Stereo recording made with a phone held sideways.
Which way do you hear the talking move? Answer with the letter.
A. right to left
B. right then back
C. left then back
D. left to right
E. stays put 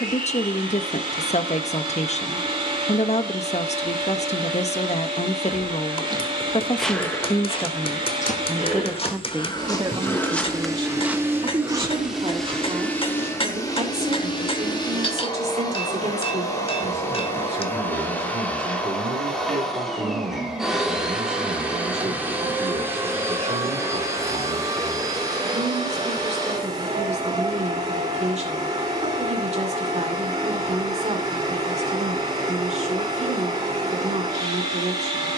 D.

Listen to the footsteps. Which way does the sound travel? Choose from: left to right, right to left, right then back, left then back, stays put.
left then back.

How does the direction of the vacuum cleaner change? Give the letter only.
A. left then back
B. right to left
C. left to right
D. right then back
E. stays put
A.